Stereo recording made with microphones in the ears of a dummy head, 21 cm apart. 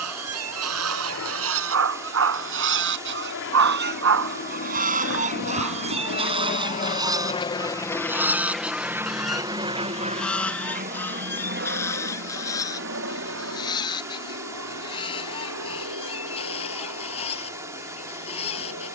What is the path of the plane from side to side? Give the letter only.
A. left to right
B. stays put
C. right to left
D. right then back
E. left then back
A.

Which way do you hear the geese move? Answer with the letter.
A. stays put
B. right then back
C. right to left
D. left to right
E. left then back
C.